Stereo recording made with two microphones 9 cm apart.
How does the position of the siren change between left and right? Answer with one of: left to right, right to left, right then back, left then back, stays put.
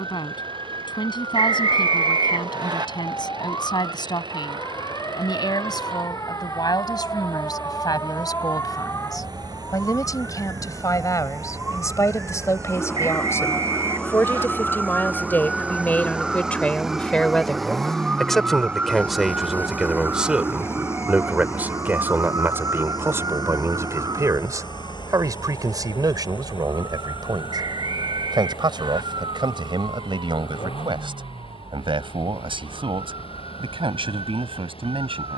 left to right.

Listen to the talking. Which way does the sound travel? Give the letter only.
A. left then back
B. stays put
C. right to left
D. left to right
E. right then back
D.